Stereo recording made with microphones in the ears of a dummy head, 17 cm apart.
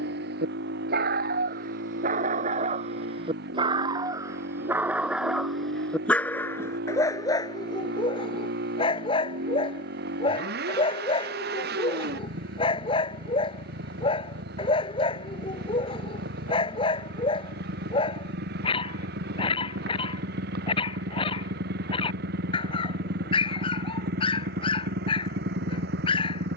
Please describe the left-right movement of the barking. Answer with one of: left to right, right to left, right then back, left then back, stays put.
right to left.